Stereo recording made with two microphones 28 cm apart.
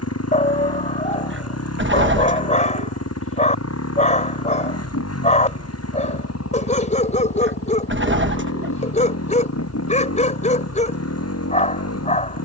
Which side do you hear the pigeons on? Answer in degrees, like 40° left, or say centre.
40° right.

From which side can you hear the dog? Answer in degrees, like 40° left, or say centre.
30° left.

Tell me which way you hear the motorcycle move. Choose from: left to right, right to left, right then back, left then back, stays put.
stays put.